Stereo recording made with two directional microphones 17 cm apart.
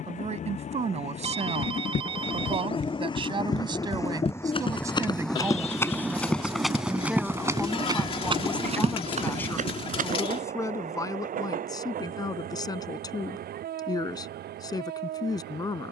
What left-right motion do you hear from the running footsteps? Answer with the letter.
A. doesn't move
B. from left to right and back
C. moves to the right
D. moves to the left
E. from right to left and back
C.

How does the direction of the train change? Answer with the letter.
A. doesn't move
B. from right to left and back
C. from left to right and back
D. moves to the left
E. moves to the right
E.